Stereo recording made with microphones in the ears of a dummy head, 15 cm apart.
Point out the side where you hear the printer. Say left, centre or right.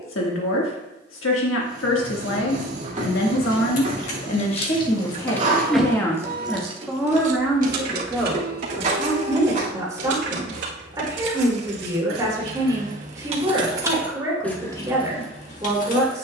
right.